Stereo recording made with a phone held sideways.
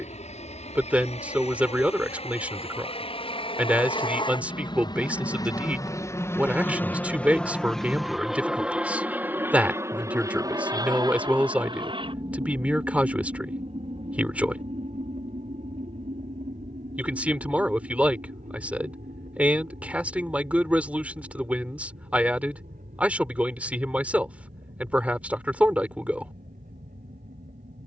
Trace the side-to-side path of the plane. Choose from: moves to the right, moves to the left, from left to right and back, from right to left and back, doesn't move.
moves to the right.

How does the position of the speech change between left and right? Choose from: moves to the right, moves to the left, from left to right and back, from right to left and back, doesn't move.
doesn't move.